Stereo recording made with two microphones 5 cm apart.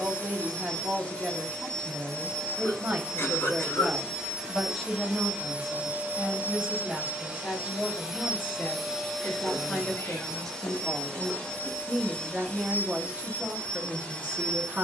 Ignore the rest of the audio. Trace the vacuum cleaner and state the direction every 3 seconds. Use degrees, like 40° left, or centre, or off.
20° left, 10° right, 20° right, 10° left, 30° left.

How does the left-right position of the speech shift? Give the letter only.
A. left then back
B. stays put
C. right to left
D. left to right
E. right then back
A.